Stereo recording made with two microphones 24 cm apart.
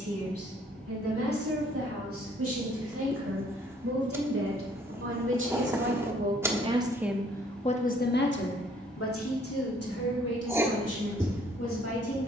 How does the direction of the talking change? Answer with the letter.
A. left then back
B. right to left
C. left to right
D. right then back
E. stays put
B.